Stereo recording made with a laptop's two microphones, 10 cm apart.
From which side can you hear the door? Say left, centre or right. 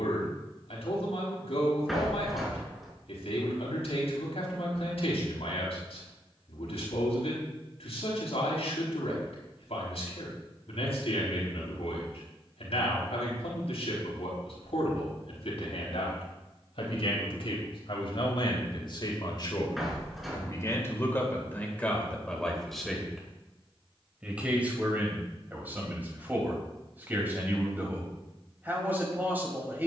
centre.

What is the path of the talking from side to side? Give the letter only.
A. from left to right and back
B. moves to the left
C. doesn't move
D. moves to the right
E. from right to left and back
D.